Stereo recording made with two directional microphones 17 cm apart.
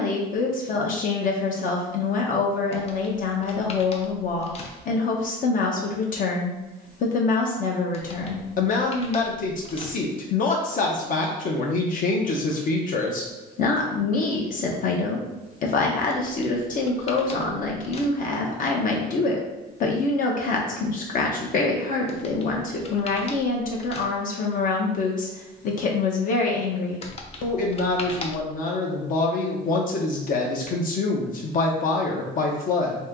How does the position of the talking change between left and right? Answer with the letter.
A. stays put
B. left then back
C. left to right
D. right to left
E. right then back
A.